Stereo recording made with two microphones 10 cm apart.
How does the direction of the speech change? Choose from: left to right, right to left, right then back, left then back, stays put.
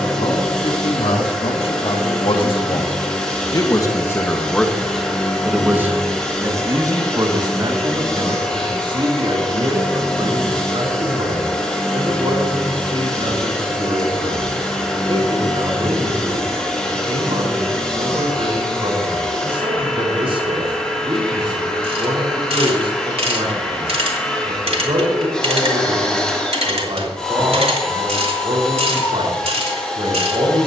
left to right.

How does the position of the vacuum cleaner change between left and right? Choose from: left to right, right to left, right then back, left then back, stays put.
stays put.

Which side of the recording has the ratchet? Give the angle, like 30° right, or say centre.
70° right.